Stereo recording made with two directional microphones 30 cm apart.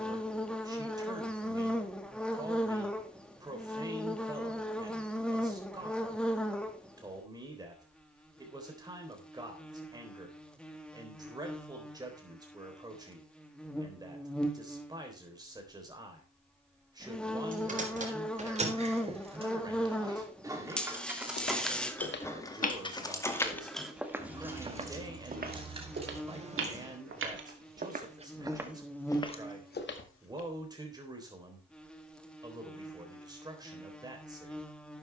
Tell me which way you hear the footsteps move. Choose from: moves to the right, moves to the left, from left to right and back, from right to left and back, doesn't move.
from left to right and back.